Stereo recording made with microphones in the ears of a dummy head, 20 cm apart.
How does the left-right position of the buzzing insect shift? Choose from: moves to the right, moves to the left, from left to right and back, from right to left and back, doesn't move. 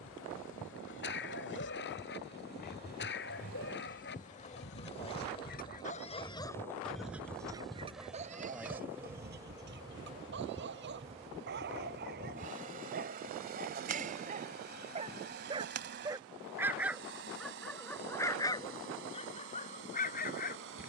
moves to the right.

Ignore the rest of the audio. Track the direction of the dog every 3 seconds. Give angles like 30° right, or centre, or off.
50° left, 50° left, 10° right, 50° right, 40° right, 10° right, 30° left.